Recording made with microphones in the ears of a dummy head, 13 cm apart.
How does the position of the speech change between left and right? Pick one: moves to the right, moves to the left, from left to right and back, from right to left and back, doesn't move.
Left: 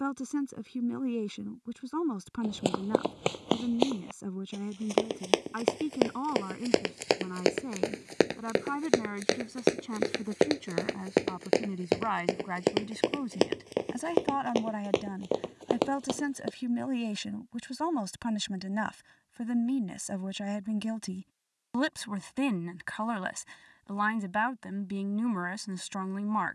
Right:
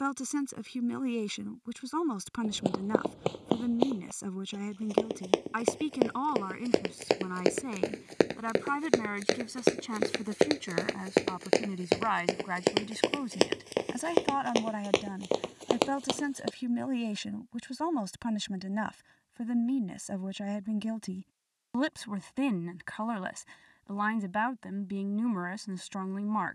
moves to the left.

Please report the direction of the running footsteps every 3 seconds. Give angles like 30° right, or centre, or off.
60° left, 50° left, 30° left, 10° right, 40° right, 50° right, off, off, off.